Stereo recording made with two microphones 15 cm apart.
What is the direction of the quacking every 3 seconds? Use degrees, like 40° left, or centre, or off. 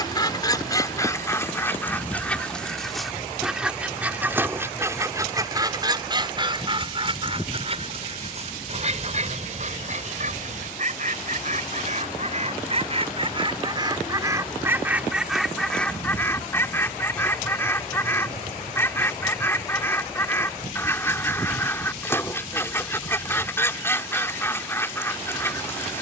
20° left, 20° right, 40° right, 50° right, 30° right, 10° left, 20° left, 20° left, 20° left.